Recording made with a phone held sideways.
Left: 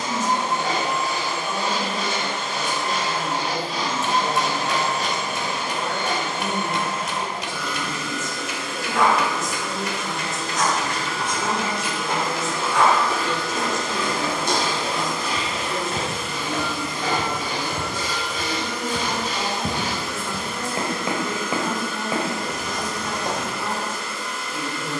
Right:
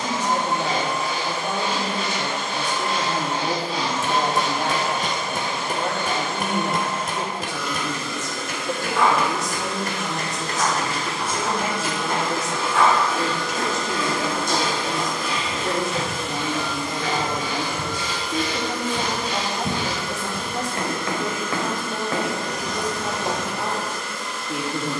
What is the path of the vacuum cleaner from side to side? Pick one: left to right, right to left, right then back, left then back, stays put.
stays put.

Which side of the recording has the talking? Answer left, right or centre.
right.